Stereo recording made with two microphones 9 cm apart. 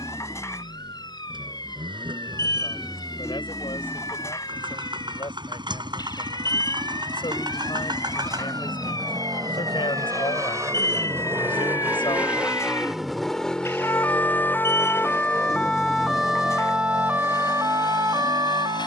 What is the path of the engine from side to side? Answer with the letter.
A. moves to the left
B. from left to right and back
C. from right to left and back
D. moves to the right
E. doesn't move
A.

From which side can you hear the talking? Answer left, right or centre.
left.